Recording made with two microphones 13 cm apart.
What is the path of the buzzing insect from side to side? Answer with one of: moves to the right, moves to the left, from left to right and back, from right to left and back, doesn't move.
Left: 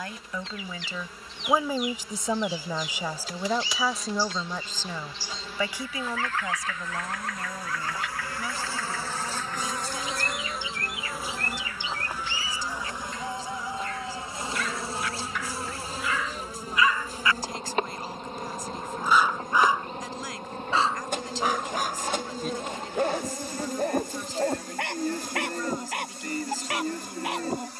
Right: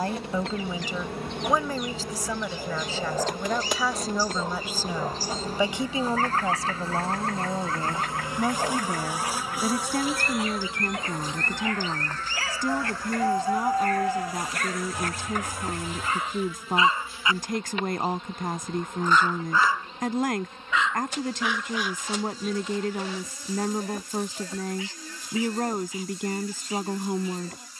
moves to the left.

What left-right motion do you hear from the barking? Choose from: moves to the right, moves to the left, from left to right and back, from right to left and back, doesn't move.
moves to the left.